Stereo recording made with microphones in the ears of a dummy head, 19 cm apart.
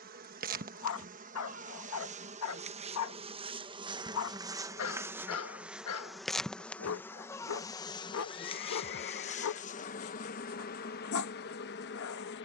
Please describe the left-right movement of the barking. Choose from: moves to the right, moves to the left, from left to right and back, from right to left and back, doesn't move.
doesn't move.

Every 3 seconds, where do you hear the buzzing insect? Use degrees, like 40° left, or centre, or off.
40° right, 20° right, 10° left, 40° left.